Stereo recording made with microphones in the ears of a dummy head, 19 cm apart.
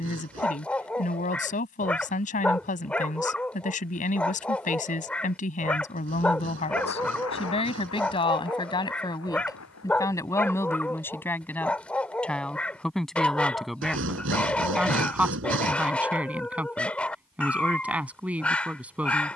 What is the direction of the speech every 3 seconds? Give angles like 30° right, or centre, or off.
40° left, 40° left, 30° left, 10° left, centre, 10° right, 10° right.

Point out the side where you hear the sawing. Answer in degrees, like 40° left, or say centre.
70° right.